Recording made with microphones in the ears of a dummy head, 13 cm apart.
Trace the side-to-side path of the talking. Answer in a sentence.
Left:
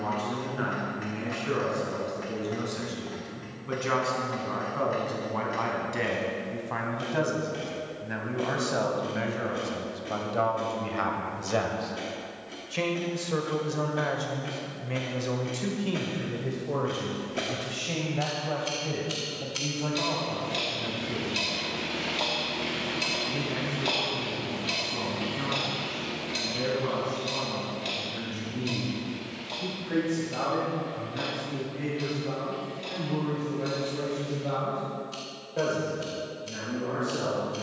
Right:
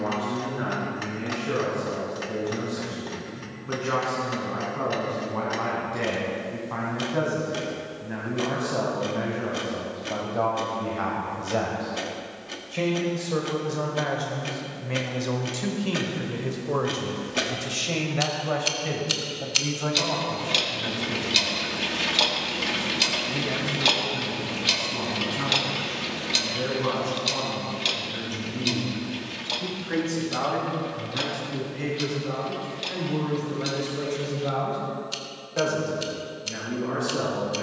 You can hear the talking go from the left side to the right.